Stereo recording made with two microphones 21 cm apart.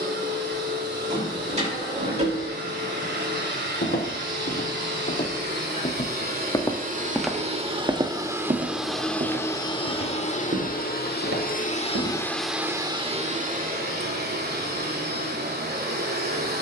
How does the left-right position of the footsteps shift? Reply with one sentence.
You can hear the footsteps move from left to right.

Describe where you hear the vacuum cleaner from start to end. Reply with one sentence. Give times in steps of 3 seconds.
You can hear the vacuum cleaner on the right from 0 s, on the left from 9 s and on the right from 12 s.